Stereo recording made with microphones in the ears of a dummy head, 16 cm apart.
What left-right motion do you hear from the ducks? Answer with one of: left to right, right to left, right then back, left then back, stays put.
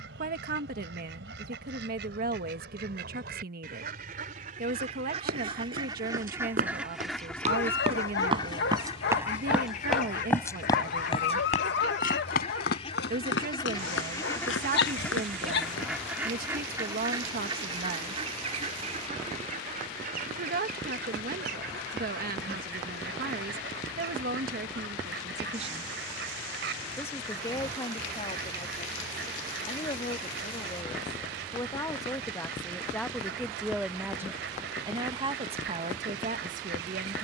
left then back.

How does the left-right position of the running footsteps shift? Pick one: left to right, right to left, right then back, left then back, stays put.
right to left.